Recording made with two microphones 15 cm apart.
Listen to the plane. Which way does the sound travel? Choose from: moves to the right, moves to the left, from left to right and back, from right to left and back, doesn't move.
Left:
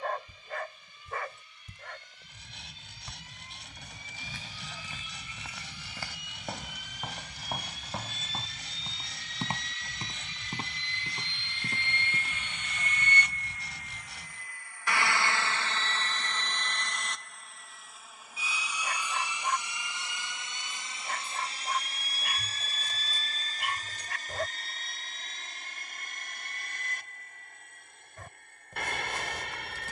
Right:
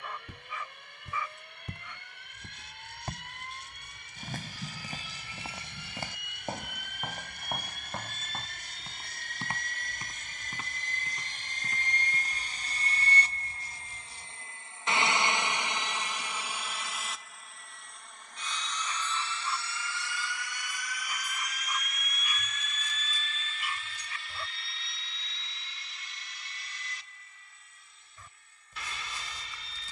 moves to the left.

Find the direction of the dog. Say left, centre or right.
left.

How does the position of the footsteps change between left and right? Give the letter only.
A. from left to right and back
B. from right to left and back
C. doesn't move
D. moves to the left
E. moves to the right
D.